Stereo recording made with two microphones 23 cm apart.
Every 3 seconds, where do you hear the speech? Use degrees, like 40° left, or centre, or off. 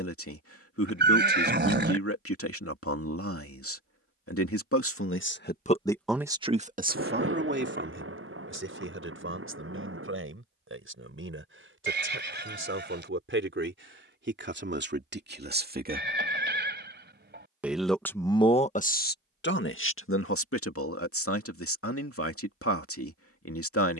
70° left, 60° left, 40° right, 60° right, 60° right, 30° right, 50° left, 70° left.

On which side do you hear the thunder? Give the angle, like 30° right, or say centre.
60° right.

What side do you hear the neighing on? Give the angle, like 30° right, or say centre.
50° right.